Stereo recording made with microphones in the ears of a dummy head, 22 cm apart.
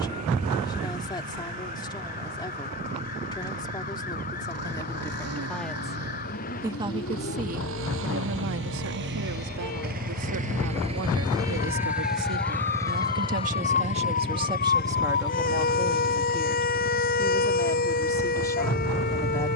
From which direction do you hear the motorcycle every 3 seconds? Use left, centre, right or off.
right, right, right, right, left, left, left.